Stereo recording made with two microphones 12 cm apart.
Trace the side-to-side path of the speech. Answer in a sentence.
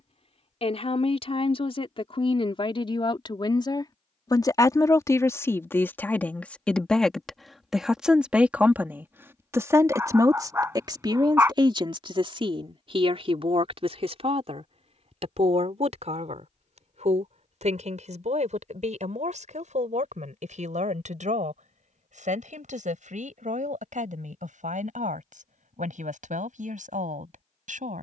In this clip you hear the speech travel towards the right.